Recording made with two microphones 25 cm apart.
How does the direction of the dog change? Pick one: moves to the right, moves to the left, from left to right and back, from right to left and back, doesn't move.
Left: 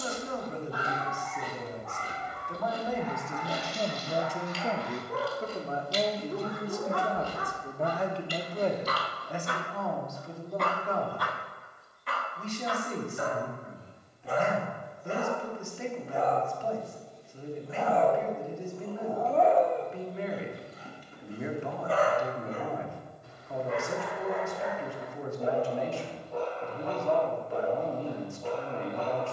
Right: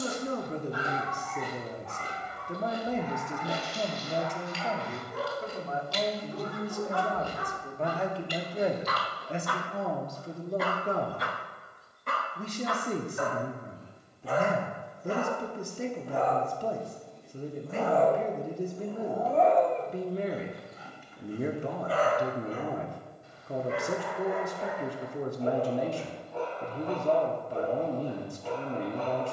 from left to right and back.